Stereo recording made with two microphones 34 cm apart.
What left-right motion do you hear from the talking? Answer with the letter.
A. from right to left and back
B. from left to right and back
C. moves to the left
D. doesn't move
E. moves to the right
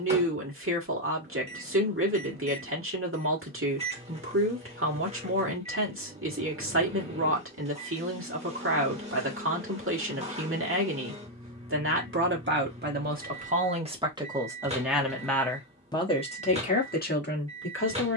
C.